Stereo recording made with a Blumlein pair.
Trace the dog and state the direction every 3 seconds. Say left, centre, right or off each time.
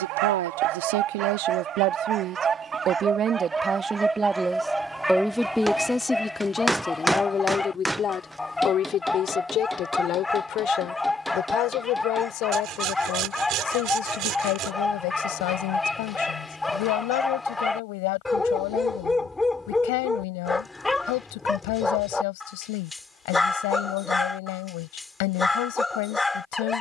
right, centre, centre, centre, centre, centre, centre, centre, centre.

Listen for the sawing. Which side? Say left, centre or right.
right.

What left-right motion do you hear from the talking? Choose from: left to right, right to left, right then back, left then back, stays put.
right to left.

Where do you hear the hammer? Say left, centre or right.
centre.